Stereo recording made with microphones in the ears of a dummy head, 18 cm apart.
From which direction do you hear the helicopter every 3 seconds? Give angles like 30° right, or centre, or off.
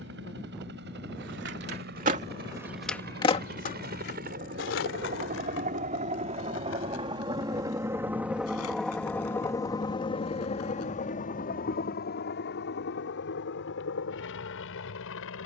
60° right, 50° right, 20° right, 30° left, 60° left.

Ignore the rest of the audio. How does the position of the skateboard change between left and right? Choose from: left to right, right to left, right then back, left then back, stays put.
right to left.